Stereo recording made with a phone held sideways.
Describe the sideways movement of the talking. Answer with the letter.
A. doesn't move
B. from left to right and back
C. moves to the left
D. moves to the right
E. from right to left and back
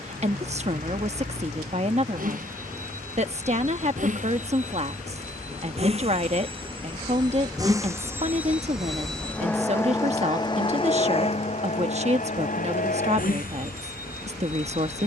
A.